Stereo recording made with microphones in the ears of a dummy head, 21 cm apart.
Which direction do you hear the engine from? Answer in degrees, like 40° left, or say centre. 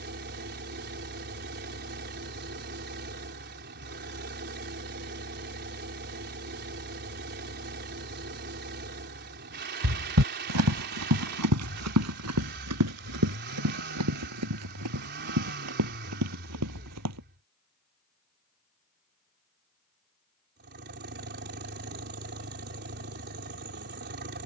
50° right.